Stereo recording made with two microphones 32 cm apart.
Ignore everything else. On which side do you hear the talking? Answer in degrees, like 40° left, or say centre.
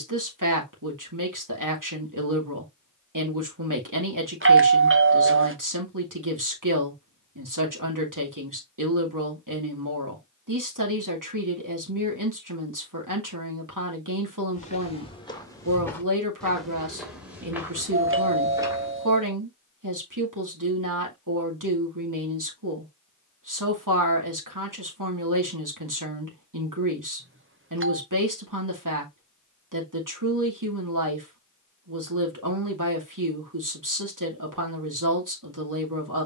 80° right.